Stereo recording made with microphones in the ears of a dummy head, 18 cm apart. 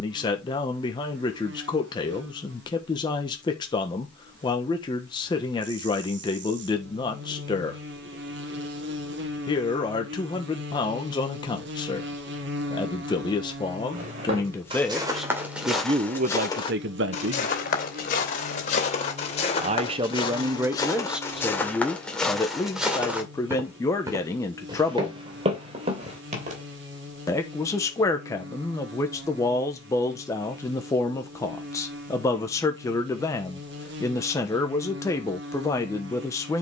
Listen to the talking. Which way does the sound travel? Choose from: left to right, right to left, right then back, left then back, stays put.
right then back.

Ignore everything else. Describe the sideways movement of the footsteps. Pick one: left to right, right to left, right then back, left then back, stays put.
left then back.